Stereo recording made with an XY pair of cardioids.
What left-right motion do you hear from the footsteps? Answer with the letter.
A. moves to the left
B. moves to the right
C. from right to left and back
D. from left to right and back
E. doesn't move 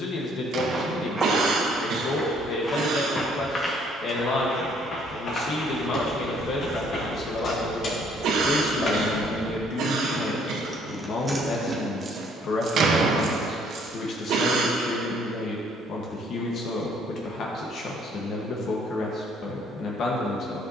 A.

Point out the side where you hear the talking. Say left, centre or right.
left.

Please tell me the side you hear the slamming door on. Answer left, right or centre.
right.